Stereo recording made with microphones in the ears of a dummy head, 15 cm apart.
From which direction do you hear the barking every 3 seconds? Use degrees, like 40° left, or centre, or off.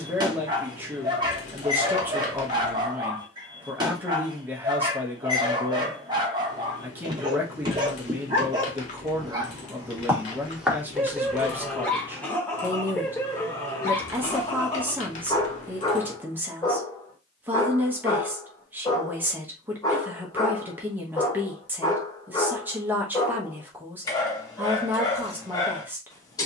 30° right, 30° right, 30° right, 10° right, 20° left, 20° left, 20° left, 20° left, 20° left.